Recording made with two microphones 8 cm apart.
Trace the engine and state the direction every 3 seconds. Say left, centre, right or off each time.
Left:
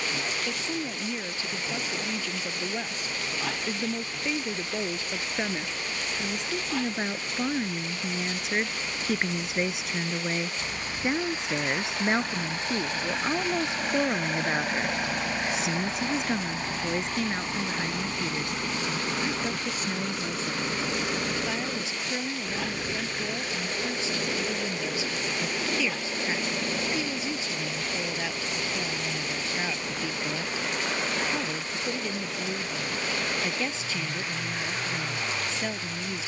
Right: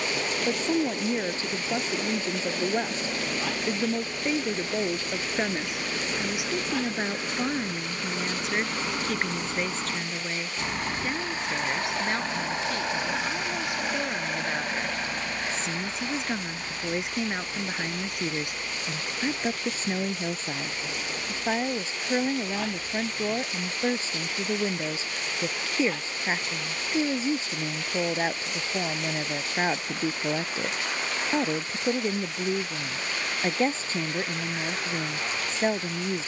right, right, right, right, centre, left, left, left, left, left, left, left.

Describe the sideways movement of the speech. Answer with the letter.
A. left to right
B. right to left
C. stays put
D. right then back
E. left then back
E.